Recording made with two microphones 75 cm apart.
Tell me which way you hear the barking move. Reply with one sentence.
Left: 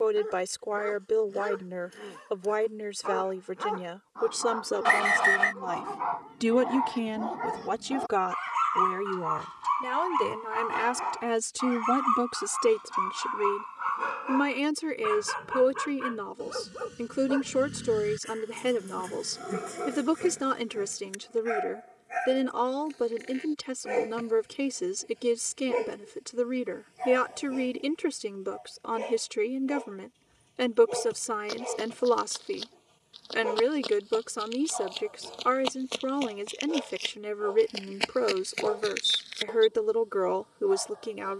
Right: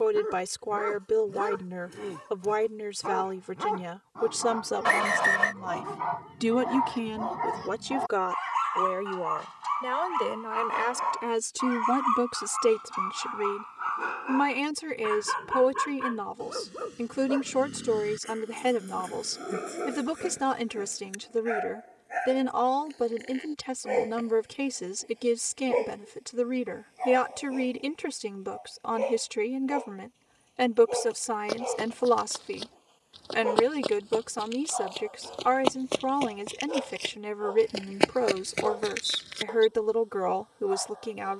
In this clip you hear the barking travel towards the left.